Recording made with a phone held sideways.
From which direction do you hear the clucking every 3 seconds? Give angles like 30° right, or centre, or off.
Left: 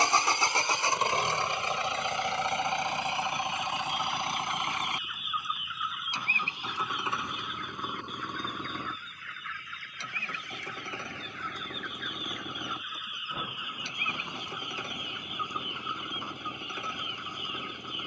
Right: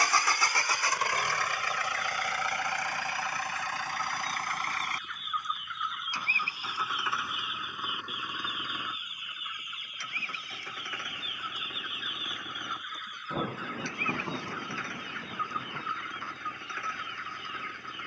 20° left, 10° left, 10° right, 20° right, 10° left, 20° left.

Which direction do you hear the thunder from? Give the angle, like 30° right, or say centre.
30° right.